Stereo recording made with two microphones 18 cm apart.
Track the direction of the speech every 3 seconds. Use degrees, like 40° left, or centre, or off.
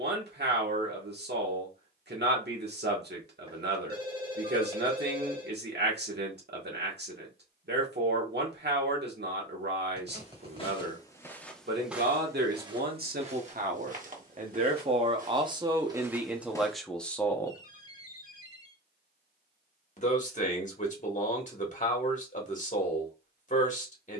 70° right, 70° right, 70° right, 70° right, 50° right, 10° right, 40° left, 40° left.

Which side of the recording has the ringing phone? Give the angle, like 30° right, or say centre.
30° right.